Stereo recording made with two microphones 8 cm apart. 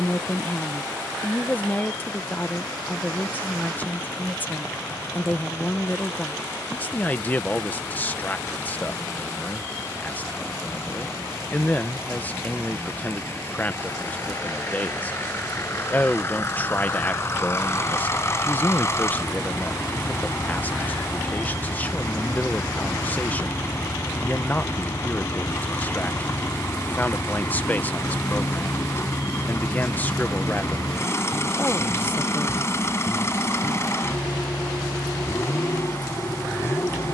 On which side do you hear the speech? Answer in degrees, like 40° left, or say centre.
20° left.